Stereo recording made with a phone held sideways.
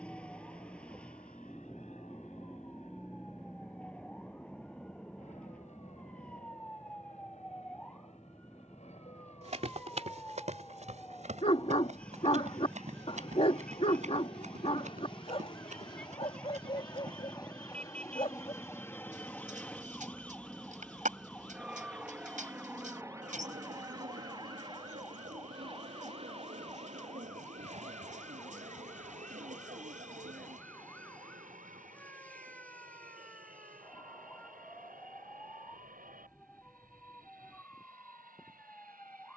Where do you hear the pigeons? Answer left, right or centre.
right.